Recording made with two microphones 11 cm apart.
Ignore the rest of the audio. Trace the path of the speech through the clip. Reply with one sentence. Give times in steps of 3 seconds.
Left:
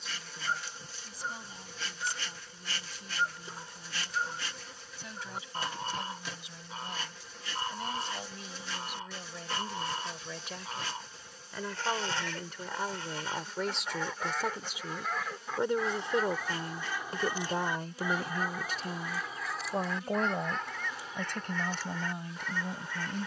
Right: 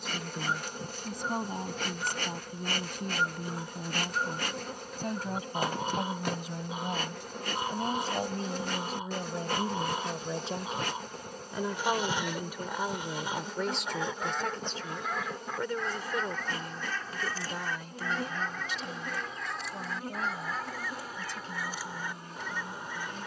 You can hear the speech on the right from 0 s, in the centre from 12 s and on the left from 15 s.